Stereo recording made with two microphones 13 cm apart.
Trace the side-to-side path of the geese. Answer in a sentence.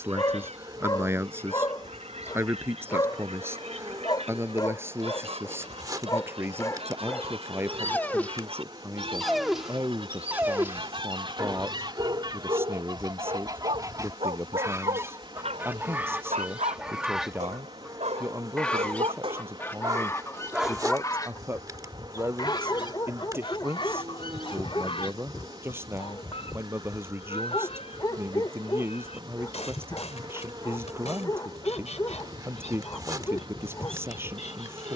In this clip you hear the geese travel towards the left.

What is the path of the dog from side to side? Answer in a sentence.
In this clip you hear the dog move from left to right and back again.